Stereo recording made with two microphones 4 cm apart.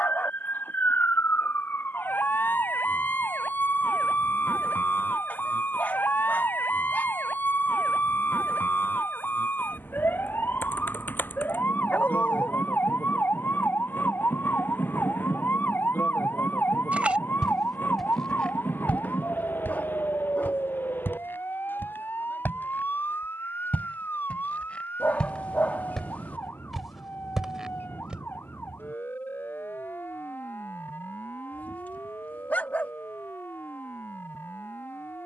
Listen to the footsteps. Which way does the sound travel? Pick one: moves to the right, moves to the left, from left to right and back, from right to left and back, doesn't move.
from right to left and back.